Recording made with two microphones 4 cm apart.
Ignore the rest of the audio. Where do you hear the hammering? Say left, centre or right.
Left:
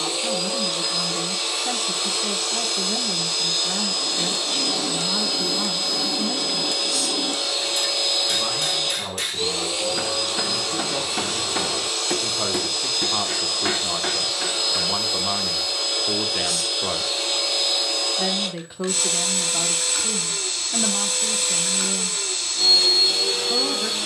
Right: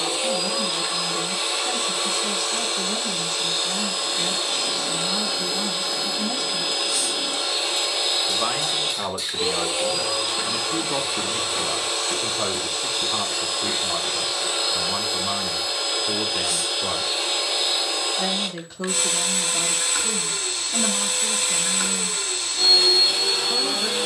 left.